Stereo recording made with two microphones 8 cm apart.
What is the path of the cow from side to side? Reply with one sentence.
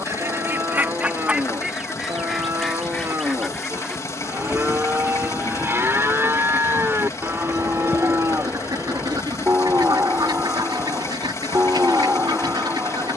In this clip you hear the cow stay put.